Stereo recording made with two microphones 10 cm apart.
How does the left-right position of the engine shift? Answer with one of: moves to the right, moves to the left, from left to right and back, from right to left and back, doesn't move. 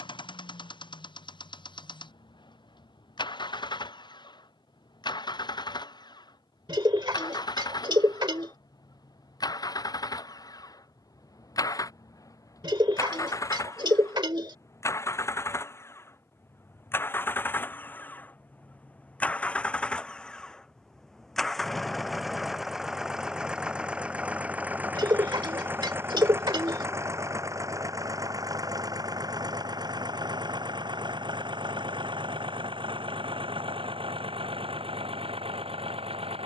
moves to the right.